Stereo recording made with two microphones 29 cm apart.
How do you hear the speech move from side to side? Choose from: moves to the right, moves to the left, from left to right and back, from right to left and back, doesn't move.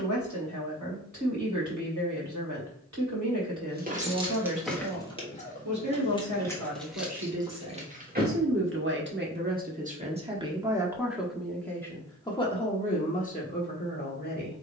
moves to the left.